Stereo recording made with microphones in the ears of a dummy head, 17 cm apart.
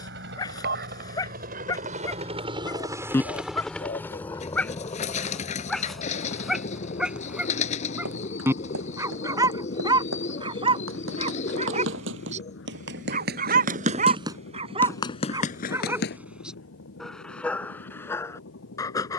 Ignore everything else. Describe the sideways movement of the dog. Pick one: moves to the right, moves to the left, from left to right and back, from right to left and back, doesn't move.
from left to right and back.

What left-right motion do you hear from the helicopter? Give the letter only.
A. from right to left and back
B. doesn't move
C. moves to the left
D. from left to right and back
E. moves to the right
C.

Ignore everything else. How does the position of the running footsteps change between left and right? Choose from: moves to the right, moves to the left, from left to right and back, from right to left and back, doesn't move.
moves to the left.